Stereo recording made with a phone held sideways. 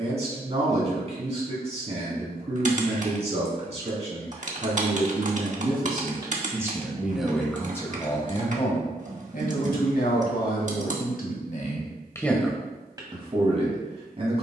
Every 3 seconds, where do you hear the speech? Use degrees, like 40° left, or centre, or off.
40° right, 40° right, 10° left, 60° left, 20° right.